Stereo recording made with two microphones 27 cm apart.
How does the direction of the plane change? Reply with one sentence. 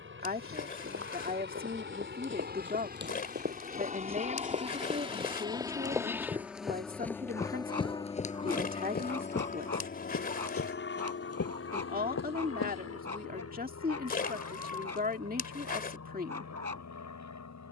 In this clip you hear the plane travel towards the left.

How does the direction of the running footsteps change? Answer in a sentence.
In this clip you hear the running footsteps move to the left.